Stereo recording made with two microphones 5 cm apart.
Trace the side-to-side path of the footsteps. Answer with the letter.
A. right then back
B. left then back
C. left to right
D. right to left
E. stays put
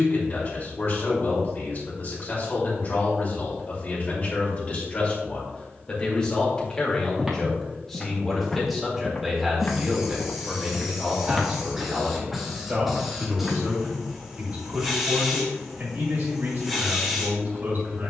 B.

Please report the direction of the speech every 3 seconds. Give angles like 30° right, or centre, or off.
40° left, 40° left, 10° left, 10° right, 30° right, 50° right.